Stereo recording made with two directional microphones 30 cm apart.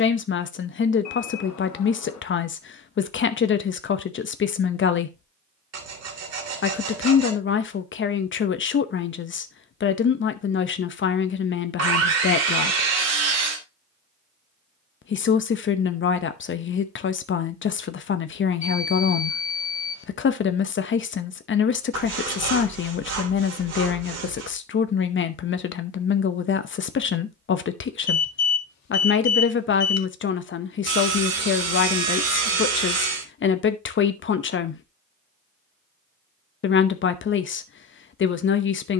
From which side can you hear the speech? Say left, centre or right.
left.